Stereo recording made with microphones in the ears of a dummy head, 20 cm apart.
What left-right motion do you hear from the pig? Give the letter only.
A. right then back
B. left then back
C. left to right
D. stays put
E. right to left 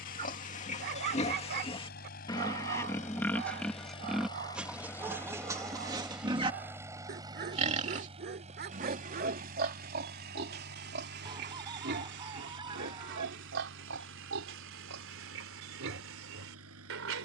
C.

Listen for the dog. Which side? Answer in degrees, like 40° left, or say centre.
50° right.